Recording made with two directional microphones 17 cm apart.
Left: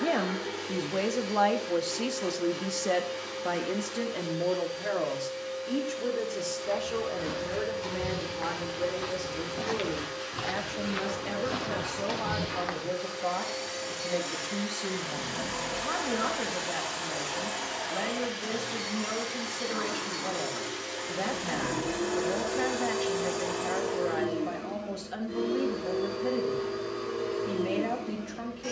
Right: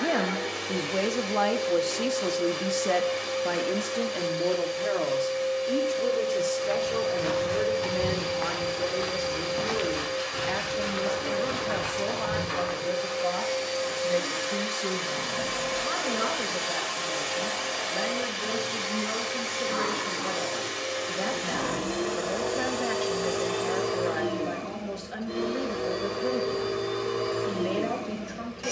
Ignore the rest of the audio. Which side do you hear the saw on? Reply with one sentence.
In this clip you hear the saw in the centre.